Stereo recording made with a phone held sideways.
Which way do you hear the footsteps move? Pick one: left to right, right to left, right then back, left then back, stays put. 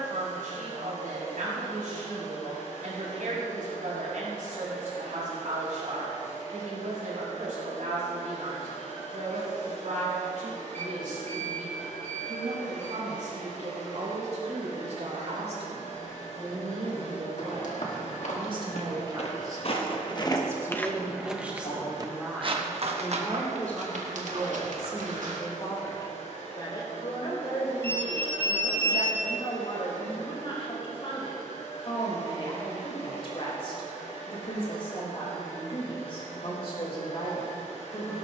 left to right.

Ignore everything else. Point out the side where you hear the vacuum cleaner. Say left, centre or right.
left.